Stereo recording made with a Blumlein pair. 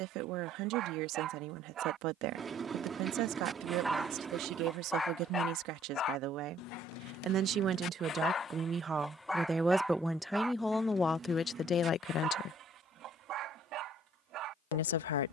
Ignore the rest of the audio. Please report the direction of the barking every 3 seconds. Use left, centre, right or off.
right, centre, left, centre, right.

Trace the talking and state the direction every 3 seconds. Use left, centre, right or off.
right, right, right, centre, left.